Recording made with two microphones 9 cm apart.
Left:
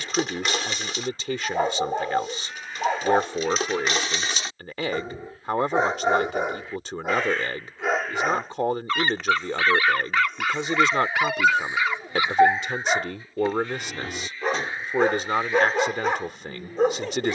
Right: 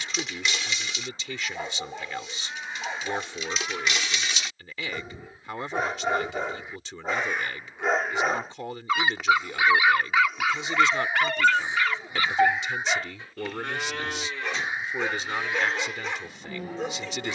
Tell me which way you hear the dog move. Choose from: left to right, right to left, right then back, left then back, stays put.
right then back.